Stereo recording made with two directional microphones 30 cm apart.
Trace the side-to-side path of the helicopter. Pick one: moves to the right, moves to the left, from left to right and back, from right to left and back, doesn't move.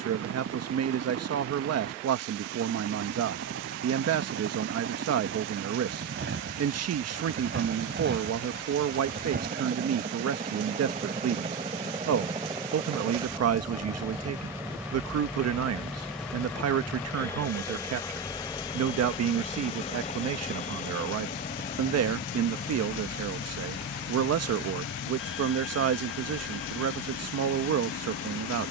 moves to the left.